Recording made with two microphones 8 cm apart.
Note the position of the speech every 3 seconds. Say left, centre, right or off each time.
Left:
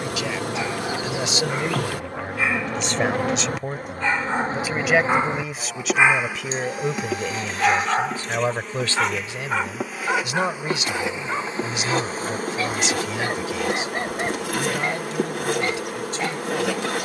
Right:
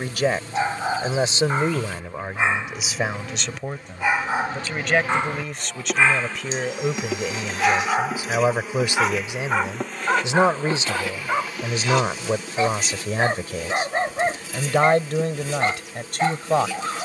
right, centre, centre, right, right, right.